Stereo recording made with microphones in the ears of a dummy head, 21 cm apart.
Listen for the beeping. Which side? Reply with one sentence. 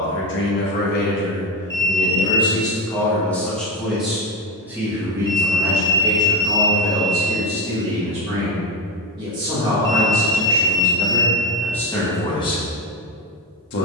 You can hear the beeping on the right.